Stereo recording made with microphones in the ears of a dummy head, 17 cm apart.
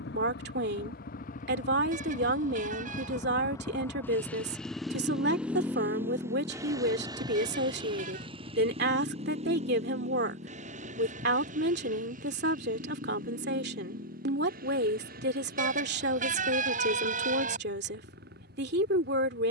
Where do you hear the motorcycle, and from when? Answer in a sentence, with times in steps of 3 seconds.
You can hear the motorcycle on the left from 0 s, in the centre from 3 s and on the right from 6 s.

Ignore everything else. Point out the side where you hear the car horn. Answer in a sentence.
You can hear the car horn on the right.